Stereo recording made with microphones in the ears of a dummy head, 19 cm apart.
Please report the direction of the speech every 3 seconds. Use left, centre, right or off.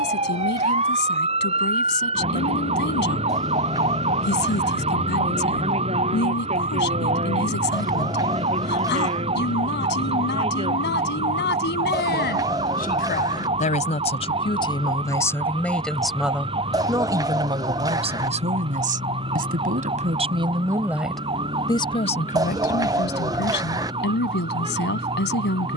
left, left, left, left, left, centre, right, left, left.